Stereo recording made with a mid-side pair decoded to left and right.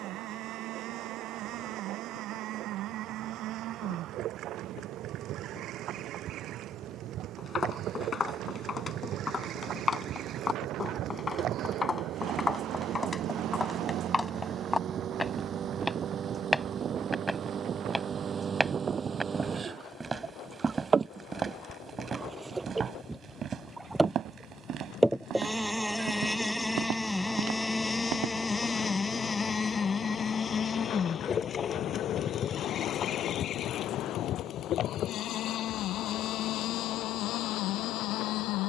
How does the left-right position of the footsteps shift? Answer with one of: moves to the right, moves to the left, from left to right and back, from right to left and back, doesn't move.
moves to the right.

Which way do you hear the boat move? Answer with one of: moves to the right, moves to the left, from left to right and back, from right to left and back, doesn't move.
moves to the left.